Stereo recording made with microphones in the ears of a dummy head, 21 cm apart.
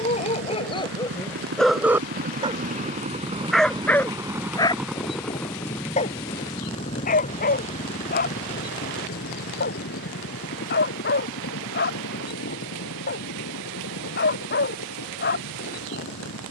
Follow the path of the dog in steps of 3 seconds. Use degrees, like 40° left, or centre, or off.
10° left, 10° left, 40° left, 40° left, 40° left, 40° left.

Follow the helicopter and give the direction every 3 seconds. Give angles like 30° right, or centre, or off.
50° right, 10° right, 30° left, 50° left, 60° left, 60° left.